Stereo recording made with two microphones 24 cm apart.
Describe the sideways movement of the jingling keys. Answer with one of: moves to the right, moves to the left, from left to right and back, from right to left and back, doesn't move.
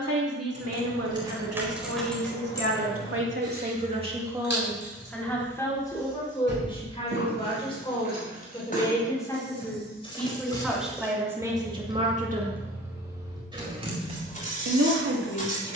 from right to left and back.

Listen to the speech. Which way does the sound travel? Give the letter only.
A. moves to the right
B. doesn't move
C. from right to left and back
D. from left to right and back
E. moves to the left
C.